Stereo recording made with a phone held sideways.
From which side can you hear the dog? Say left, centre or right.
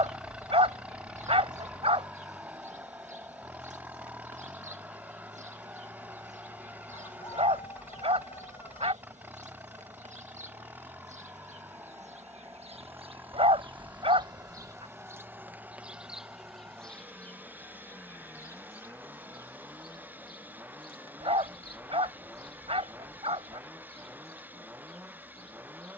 right.